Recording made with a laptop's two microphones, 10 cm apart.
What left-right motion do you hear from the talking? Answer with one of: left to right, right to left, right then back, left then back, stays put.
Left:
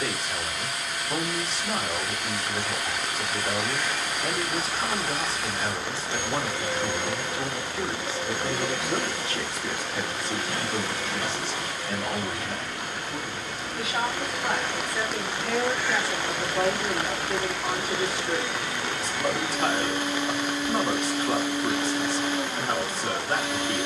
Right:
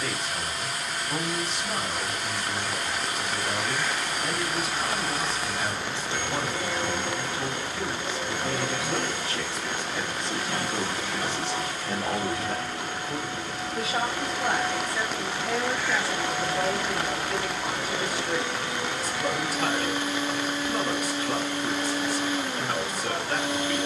right then back.